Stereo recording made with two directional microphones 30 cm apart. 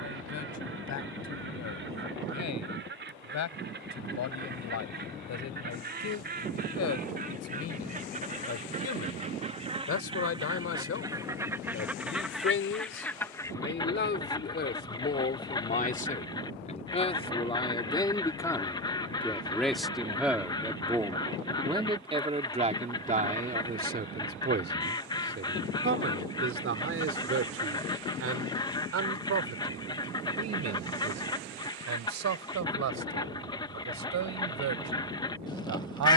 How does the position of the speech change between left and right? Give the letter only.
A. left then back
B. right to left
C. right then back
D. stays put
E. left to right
E.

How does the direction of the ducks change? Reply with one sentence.
In this clip you hear the ducks move from right to left.